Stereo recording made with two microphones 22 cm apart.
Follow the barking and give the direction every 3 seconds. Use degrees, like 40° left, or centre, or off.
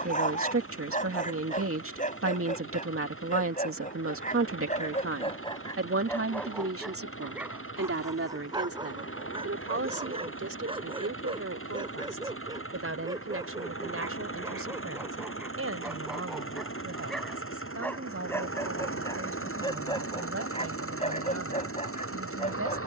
40° left, 30° left, 10° right, 20° right, 20° right, centre, 20° left, 30° left.